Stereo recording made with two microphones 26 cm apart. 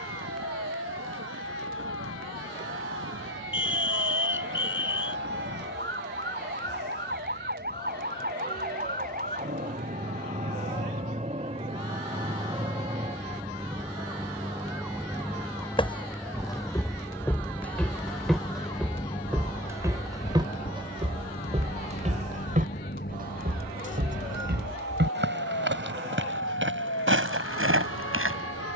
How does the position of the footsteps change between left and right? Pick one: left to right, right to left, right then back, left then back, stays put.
left to right.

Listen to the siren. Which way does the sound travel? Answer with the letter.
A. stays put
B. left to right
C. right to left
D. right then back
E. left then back
C.